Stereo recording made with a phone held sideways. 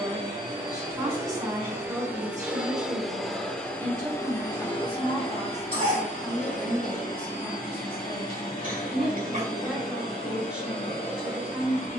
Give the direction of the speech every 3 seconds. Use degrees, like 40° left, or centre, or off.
20° right, 10° right, 10° left, 10° right.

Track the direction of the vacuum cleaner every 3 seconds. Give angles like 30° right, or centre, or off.
20° right, 20° left, 60° left, 80° left.